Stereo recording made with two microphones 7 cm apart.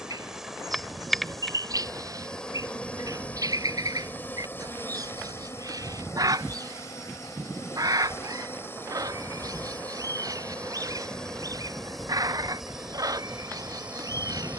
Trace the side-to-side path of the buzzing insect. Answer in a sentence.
You can hear the buzzing insect go left and come back.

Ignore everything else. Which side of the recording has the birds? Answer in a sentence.
You can hear the birds on the right.